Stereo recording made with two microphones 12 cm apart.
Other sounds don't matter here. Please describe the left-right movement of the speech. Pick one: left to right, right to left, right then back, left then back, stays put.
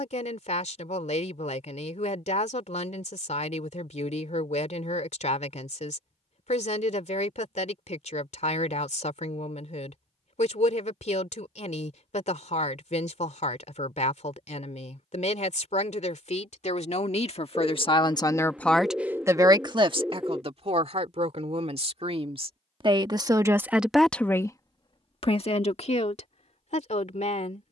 right then back.